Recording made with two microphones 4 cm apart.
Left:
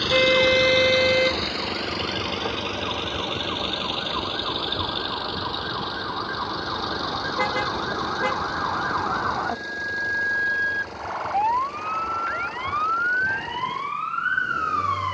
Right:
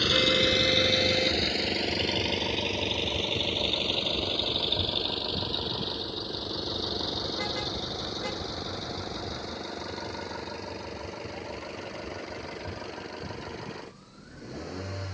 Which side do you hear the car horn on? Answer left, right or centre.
left.